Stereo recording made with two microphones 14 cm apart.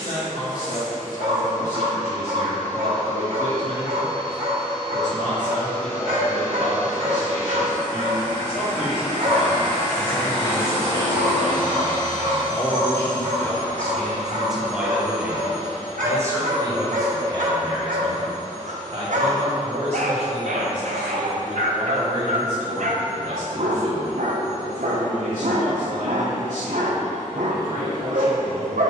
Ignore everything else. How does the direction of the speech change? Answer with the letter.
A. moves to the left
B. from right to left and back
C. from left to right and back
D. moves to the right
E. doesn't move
D.